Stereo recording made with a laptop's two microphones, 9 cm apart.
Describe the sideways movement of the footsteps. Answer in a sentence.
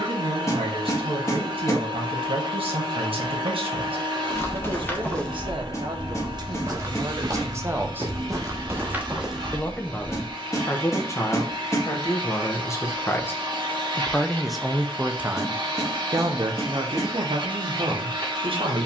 You can hear the footsteps move from left to right and back again.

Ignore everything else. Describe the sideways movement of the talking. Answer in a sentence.
In this clip you hear the talking move from right to left and back again.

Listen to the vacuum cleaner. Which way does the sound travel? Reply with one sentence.
You can hear the vacuum cleaner stay in one place.